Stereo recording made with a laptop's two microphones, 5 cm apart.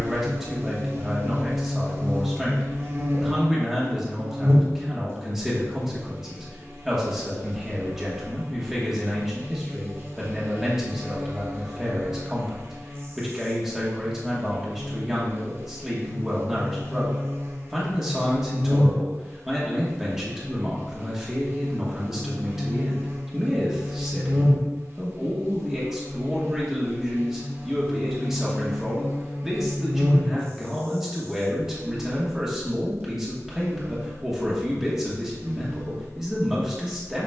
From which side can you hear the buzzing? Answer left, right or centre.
right.